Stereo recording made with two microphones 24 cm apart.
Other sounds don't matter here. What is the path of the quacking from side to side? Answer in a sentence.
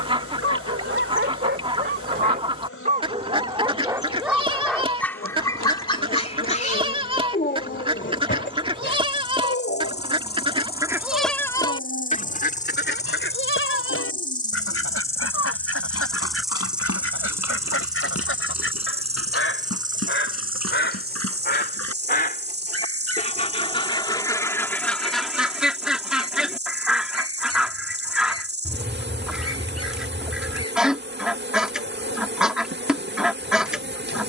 You can hear the quacking move from right to left and back again.